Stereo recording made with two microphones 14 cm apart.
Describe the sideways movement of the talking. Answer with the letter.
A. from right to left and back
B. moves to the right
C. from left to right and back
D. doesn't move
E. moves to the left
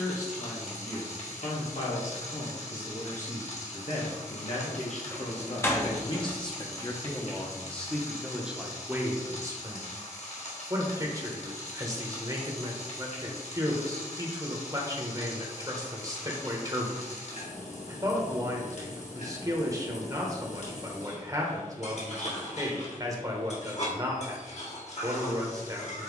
B.